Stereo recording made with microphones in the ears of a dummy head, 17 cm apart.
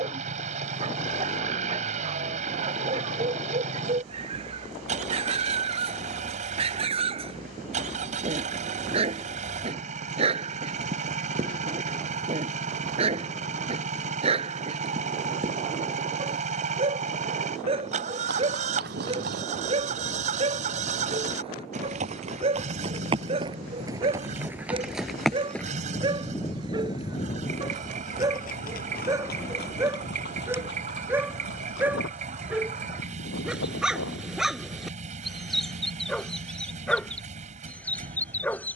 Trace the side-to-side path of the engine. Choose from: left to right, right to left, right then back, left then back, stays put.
stays put.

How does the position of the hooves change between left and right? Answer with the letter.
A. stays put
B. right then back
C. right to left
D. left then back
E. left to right
C.